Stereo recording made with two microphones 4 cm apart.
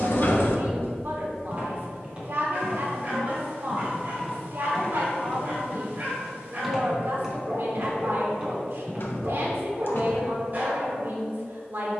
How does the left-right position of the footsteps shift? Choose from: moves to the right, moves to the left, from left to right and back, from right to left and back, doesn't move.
from right to left and back.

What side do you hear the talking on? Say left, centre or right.
right.